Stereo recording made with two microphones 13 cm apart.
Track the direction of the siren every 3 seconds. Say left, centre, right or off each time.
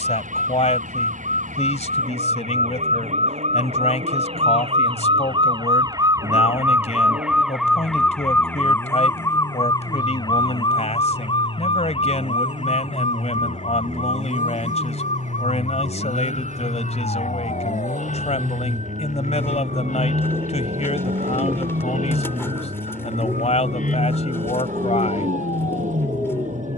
right, right, centre, left, left, left, left, left, left.